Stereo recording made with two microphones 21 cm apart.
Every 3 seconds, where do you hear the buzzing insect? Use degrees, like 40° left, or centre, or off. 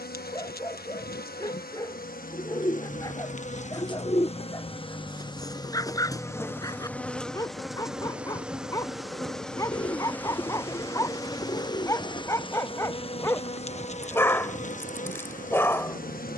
40° left, 30° left, centre, 10° left, 30° left, 40° left.